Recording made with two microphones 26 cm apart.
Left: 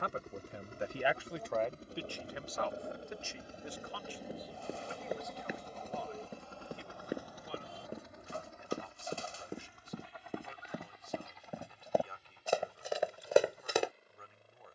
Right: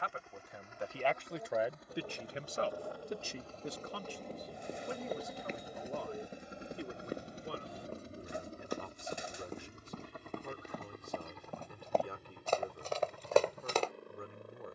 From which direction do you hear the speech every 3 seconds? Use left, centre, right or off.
centre, right, right, right, right.